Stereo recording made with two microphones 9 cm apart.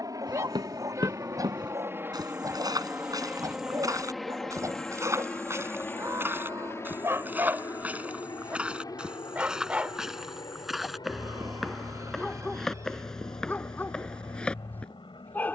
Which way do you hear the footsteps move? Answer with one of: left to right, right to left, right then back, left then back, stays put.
right to left.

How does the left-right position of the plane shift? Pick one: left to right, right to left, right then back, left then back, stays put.
right to left.